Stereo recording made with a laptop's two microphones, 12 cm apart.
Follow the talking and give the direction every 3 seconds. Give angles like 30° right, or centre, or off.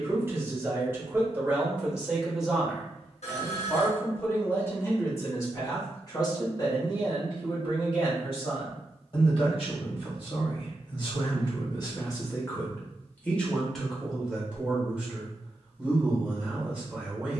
10° right, 20° left, 40° left, 50° left, 10° left, 10° right.